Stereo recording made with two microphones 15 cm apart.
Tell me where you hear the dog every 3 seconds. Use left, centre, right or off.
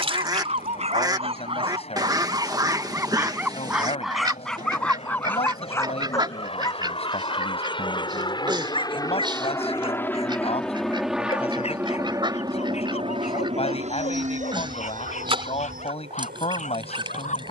right, centre, left, left, left, left.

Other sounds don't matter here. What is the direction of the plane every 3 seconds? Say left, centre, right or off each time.
left, left, left, centre, right, right.